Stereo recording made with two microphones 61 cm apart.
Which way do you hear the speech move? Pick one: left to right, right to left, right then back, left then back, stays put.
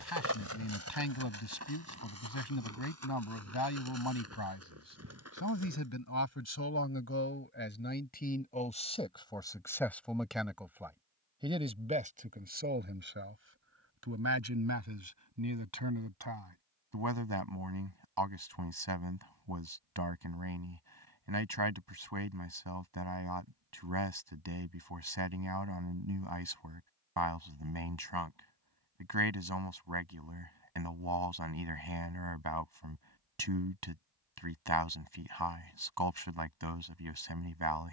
left to right.